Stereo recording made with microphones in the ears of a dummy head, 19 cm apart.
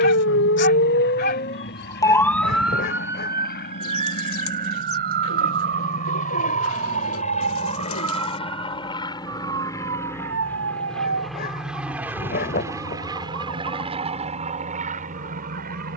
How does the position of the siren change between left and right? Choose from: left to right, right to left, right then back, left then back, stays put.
left to right.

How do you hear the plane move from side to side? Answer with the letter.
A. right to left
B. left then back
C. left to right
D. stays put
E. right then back
C.